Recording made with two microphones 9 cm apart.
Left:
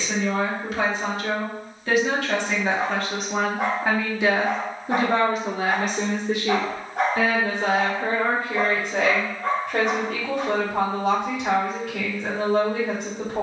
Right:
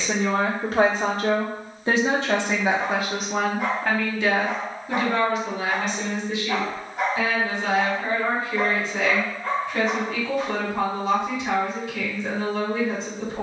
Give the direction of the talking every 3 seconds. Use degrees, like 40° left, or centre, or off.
30° right, 20° left, 60° left, 70° left, 70° left.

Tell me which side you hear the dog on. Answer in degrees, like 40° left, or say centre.
70° left.